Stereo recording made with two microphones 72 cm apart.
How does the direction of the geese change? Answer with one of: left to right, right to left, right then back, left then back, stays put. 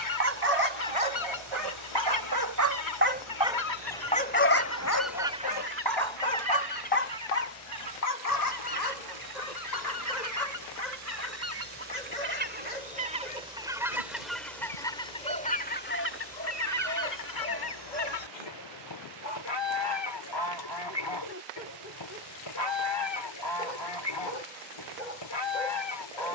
right then back.